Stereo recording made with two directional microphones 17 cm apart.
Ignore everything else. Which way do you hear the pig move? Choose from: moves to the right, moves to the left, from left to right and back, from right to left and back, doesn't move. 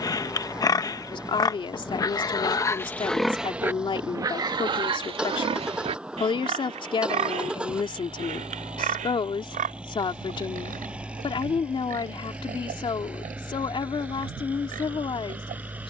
moves to the right.